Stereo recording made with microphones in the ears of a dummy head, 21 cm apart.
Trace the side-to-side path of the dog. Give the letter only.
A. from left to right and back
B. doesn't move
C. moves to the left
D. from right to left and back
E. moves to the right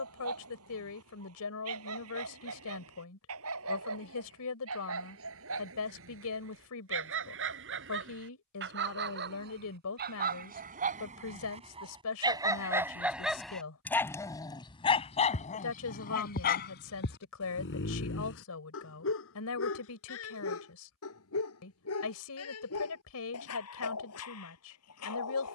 C.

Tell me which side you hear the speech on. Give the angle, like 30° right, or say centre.
70° left.